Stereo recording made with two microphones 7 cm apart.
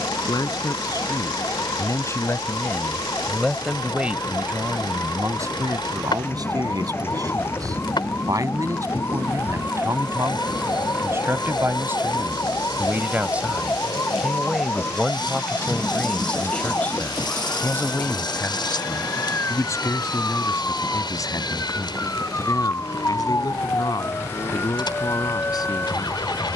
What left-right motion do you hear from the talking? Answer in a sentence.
You can hear the talking go right and come back.